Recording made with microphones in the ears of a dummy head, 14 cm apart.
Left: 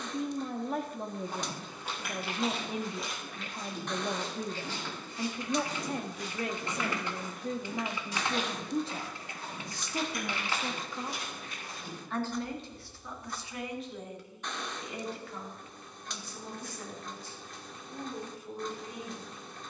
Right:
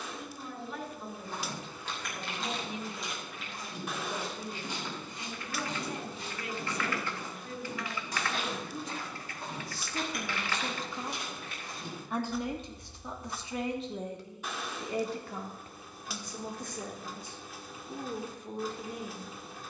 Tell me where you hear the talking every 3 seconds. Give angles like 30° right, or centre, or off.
40° left, 40° left, 40° left, 10° left, 20° right, 40° right, 40° right.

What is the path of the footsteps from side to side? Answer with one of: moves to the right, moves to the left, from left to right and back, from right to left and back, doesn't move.
moves to the right.